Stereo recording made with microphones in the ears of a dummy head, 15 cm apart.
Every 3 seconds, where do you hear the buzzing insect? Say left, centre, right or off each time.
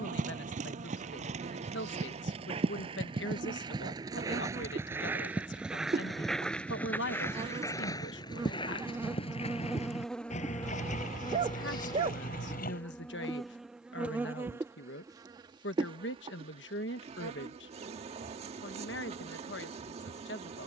right, right, right, centre, centre, right, right.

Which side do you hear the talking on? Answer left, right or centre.
left.